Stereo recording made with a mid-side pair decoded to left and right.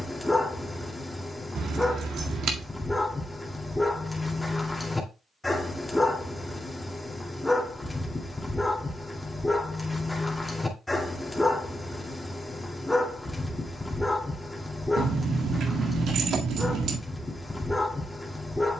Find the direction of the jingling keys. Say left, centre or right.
right.